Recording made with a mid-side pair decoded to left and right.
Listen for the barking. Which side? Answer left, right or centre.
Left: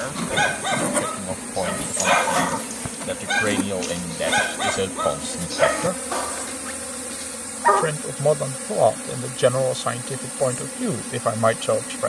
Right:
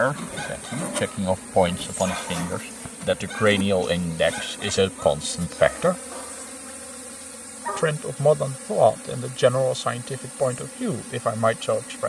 left.